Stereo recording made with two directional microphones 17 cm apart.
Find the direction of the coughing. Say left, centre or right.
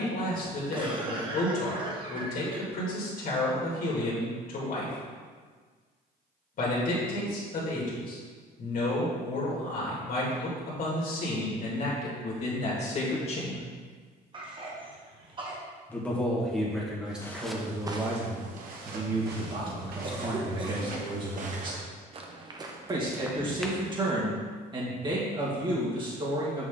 right.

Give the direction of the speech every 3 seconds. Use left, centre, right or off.
left, left, left, left, left, centre, right, right, right.